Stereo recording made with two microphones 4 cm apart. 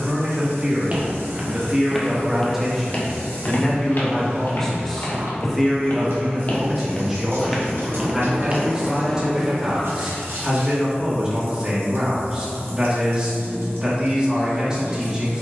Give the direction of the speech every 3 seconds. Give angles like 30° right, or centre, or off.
10° right, 10° left, 10° right, 20° right, 20° right.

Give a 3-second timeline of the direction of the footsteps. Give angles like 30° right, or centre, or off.
centre, 50° left, 10° left, off, off.